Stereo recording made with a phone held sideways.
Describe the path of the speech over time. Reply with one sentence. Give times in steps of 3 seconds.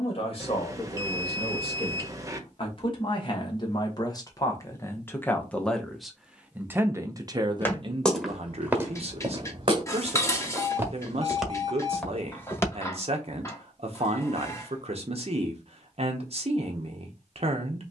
You can hear the speech on the left from 0 s and on the right from 6 s.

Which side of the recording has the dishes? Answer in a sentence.
In this clip you hear the dishes on the left.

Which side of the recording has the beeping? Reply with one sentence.
You can hear the beeping on the right.